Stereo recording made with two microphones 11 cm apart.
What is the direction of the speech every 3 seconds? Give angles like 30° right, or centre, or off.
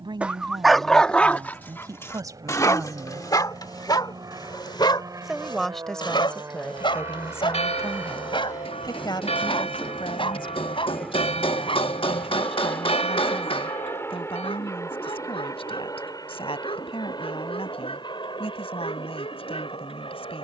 40° right, 10° right, 20° left, 50° left, 60° left, 60° left, 60° left.